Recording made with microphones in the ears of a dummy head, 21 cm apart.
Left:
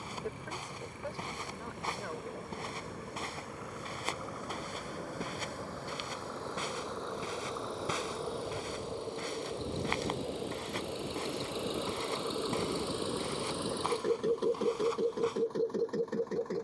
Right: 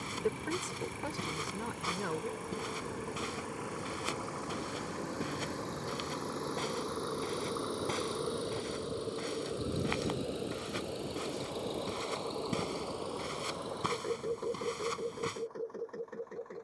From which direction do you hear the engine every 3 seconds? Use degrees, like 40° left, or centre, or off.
60° right, 50° right, 30° right, centre, 30° left, 50° left.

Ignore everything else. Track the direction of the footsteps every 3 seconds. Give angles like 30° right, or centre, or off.
20° right, 10° right, centre, 10° right, 20° right, 30° right.